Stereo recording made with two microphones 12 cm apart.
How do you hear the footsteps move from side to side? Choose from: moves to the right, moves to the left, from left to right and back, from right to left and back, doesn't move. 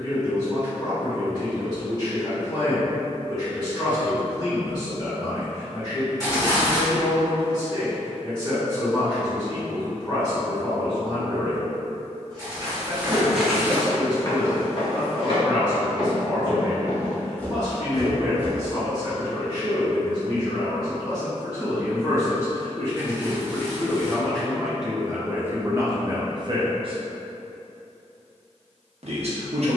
from right to left and back.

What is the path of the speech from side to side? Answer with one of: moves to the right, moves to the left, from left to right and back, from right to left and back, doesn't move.
moves to the right.